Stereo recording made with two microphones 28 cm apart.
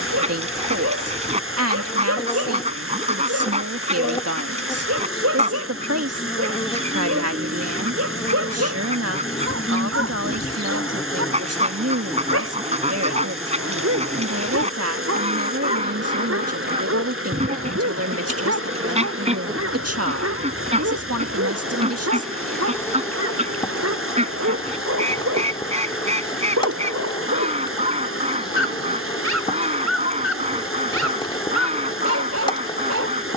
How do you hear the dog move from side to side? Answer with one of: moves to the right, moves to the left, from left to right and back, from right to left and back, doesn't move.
doesn't move.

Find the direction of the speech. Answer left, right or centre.
right.